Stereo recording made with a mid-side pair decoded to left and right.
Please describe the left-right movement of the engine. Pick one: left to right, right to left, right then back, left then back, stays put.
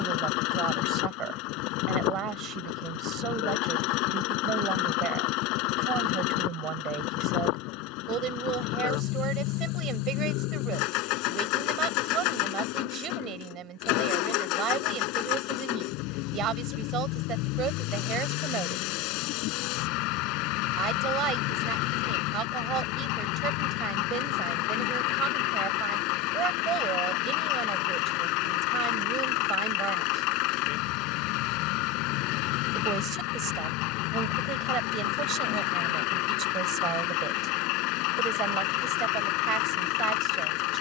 stays put.